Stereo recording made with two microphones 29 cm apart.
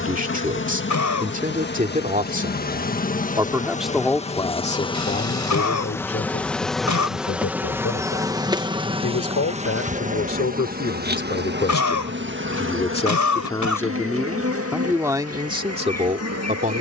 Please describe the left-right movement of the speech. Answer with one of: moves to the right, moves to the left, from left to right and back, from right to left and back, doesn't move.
from right to left and back.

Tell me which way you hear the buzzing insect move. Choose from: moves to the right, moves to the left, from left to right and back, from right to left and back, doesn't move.
moves to the right.